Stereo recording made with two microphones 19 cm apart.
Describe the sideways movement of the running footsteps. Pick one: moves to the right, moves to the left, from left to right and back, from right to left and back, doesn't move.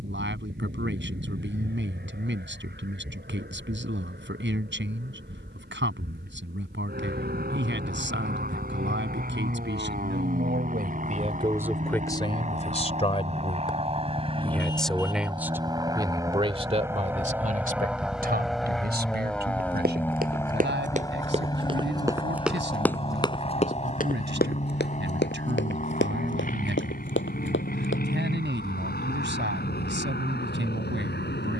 moves to the left.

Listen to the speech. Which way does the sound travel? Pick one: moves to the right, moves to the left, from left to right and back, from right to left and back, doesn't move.
from right to left and back.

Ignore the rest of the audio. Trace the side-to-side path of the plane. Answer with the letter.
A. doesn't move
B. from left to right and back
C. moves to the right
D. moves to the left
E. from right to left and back
D.